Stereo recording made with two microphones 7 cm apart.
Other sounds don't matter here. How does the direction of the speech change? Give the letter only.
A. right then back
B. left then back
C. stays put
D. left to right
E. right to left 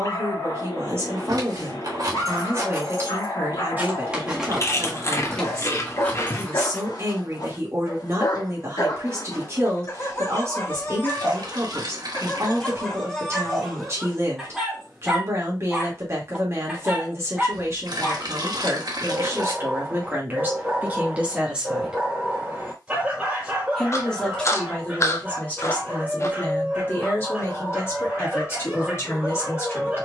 E.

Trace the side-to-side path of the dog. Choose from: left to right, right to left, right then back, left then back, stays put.
left to right.